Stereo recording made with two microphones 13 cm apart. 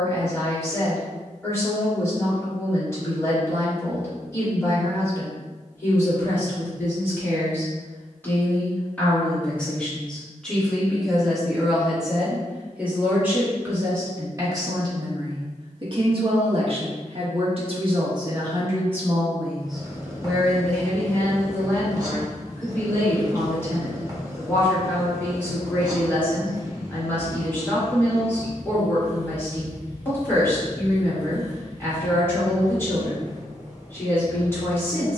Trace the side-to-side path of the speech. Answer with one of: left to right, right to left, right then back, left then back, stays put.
right then back.